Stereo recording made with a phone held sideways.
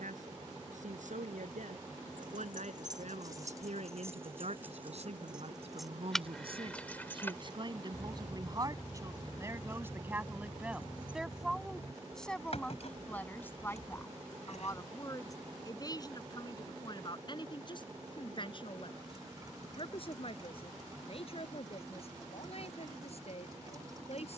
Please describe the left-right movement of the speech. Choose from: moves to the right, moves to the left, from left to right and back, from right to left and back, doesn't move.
moves to the left.